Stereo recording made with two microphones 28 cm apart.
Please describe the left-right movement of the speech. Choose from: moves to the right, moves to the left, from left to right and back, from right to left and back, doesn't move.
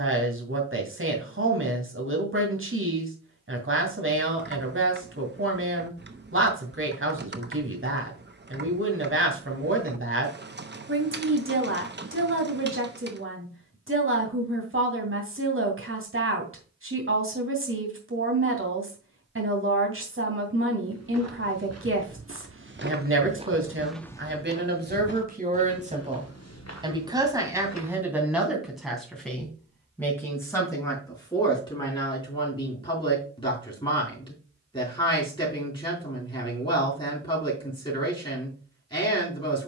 moves to the left.